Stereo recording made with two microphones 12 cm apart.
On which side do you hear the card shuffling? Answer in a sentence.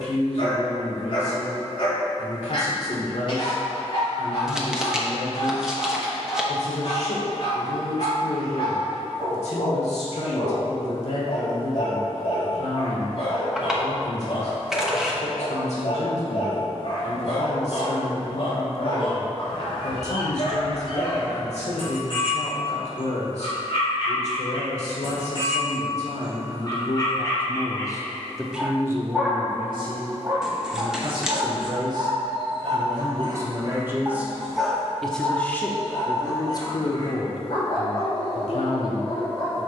In this clip you hear the card shuffling in the centre.